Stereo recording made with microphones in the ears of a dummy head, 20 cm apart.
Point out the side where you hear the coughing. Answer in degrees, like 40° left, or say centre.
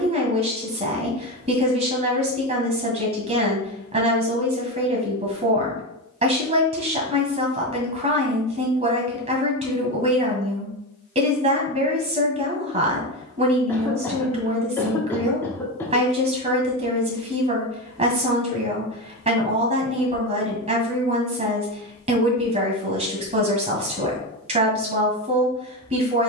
10° left.